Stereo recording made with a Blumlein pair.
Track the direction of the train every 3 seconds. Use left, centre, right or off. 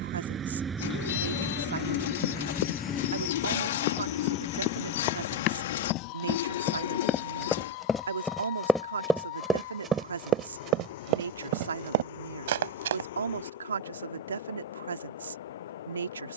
centre, left, left, left, left, left.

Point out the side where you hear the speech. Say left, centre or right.
right.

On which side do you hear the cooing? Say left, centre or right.
left.